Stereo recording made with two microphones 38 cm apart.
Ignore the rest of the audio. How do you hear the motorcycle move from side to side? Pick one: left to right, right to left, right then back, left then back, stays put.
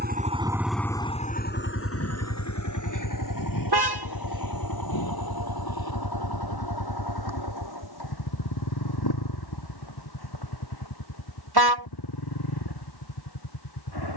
right to left.